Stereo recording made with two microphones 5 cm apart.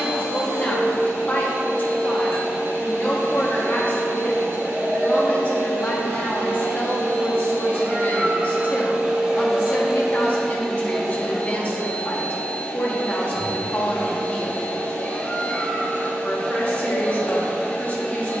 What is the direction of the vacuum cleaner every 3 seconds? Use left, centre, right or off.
right, right, right, centre, left, left.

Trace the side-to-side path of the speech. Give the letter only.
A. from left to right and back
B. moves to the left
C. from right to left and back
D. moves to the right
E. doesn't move
E.